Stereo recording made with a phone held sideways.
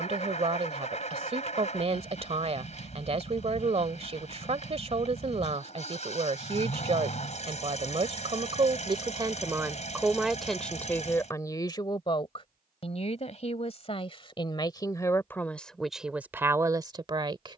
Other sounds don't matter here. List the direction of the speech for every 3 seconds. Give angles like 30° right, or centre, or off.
40° right, 40° right, 40° right, centre, 40° left, 10° right.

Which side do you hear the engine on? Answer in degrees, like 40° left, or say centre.
50° left.